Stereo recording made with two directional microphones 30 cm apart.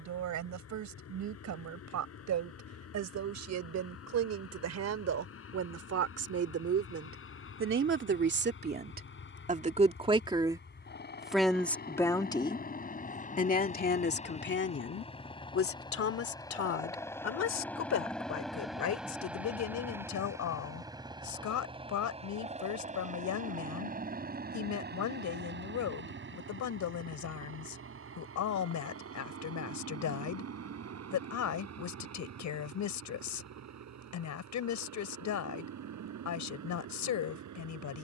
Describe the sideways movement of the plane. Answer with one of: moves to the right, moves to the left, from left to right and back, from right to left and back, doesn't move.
moves to the right.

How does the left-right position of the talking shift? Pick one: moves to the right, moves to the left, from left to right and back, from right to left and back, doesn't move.
moves to the left.